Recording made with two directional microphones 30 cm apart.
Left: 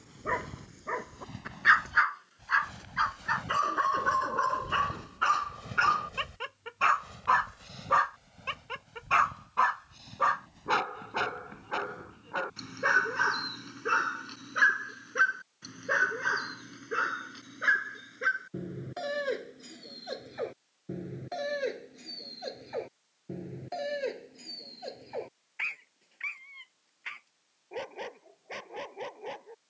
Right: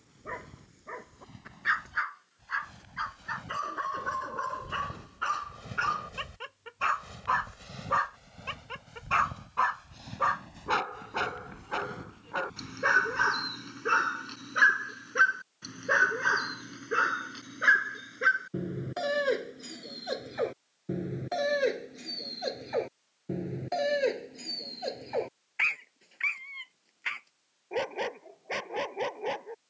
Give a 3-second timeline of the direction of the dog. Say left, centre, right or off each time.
left, left, left, centre, centre, right, right, right, right, right.